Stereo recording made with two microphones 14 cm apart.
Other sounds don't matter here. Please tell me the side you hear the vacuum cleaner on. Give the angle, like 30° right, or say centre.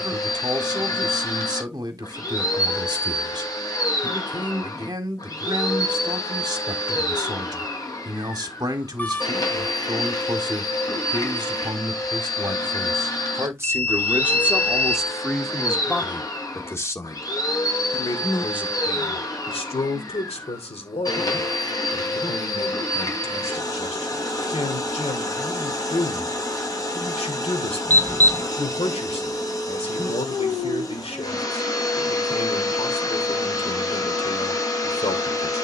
30° left.